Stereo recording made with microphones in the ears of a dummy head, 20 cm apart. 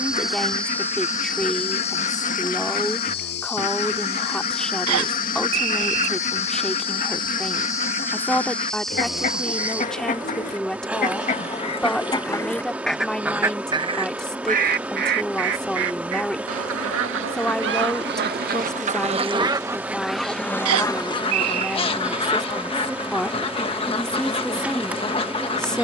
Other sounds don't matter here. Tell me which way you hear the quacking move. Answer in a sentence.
In this clip you hear the quacking go right and come back.